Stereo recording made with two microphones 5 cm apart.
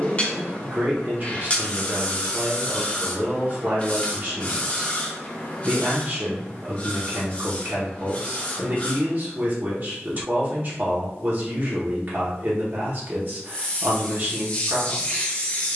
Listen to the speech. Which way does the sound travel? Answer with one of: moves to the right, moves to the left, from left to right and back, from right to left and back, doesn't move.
doesn't move.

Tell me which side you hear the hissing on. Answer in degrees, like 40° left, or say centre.
30° left.